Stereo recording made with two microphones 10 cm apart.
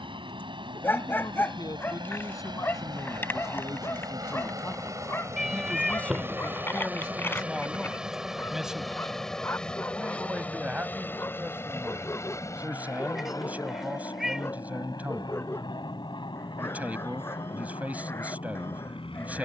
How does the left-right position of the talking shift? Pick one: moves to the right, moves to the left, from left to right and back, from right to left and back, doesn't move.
moves to the right.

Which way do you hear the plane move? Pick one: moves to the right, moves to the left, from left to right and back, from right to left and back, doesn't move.
moves to the left.